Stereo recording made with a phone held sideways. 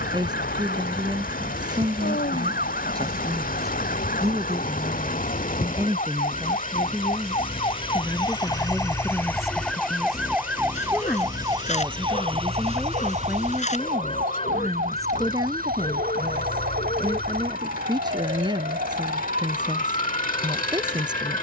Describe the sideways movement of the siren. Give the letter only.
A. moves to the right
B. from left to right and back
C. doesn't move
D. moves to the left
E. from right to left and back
A.